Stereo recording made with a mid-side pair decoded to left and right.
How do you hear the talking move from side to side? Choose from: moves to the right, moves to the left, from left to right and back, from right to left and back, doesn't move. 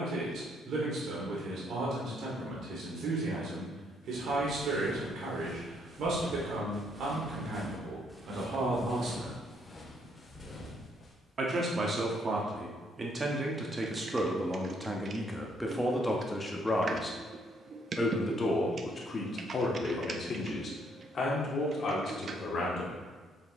moves to the left.